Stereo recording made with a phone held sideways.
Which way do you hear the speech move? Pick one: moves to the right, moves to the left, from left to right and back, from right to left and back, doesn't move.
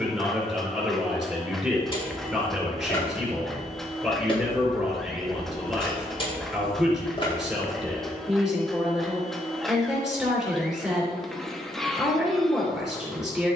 doesn't move.